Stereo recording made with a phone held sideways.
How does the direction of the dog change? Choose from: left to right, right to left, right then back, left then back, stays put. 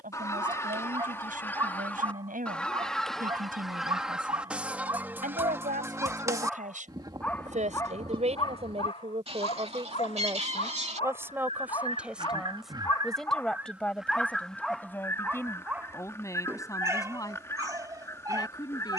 left then back.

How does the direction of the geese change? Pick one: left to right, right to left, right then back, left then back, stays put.
right then back.